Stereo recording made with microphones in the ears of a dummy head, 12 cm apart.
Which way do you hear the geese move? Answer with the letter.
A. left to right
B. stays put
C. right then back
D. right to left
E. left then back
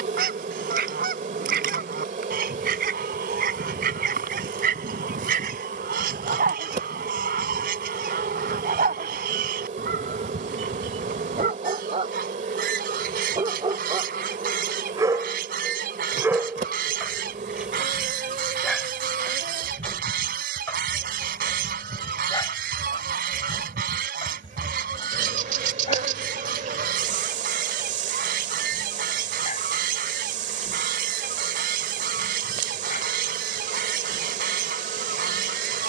B.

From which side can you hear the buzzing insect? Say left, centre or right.
right.